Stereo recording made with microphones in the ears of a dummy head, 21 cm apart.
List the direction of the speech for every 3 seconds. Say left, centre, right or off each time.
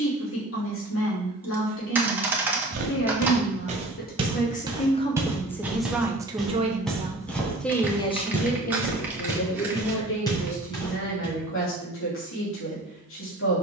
left, left, centre, left, left.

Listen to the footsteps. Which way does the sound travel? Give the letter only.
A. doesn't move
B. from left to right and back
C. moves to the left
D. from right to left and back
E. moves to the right
C.